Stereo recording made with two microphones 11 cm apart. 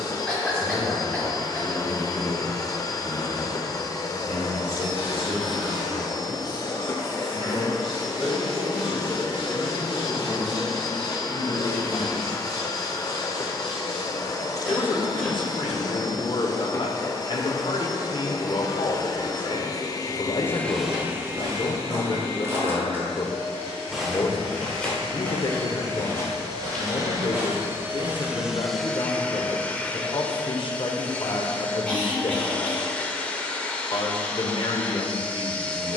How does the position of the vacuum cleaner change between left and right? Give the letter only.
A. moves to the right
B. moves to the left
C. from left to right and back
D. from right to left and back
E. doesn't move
C.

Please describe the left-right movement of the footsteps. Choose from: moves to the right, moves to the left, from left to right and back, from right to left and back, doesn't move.
from right to left and back.